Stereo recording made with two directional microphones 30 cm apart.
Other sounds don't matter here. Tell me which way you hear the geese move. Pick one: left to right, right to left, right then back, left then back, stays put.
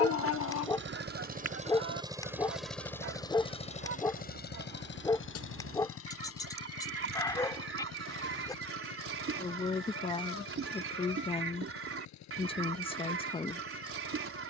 stays put.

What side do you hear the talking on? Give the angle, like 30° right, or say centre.
20° left.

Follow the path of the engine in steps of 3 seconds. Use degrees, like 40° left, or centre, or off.
20° right, 30° left, 50° left, 60° left, 70° left.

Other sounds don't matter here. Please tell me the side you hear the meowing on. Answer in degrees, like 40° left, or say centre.
50° left.